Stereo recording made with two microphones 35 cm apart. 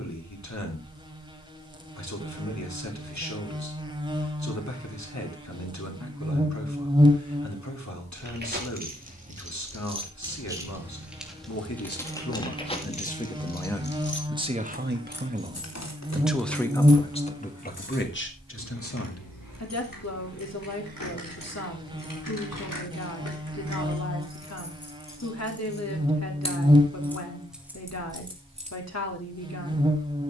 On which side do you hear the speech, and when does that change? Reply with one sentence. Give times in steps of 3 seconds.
In this clip you hear the speech on the left from 0 s, in the centre from 12 s and on the left from 18 s.